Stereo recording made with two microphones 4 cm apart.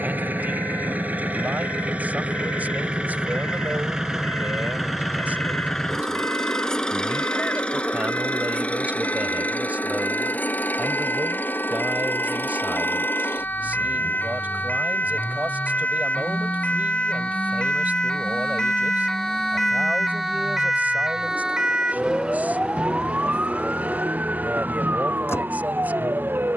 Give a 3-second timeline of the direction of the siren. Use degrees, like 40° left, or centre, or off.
70° left, 70° left, 60° left, 60° left, 50° left, 30° left, 10° left, 20° right, 40° right.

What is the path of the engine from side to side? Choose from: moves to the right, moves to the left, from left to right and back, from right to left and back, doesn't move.
moves to the left.